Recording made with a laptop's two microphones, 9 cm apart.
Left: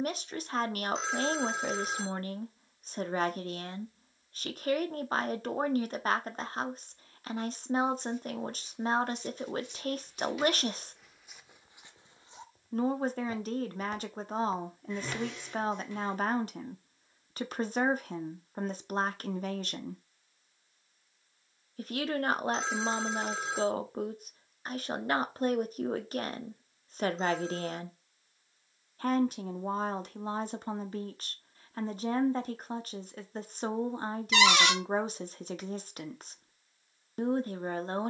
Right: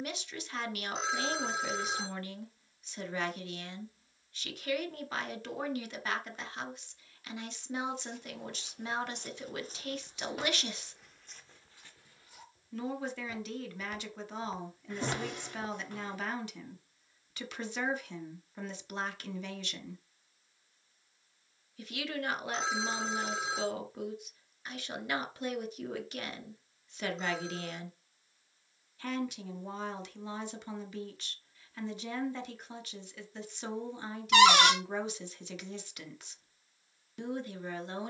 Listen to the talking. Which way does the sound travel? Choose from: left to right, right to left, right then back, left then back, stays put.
stays put.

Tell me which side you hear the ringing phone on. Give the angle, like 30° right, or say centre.
centre.